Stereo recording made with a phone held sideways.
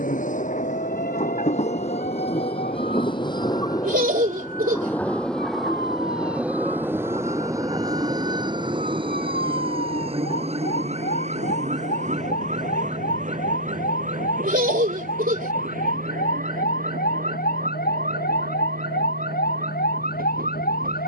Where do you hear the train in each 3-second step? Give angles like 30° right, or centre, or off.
50° left, 20° left, 20° right, 40° right, 50° right, 60° right, 60° right.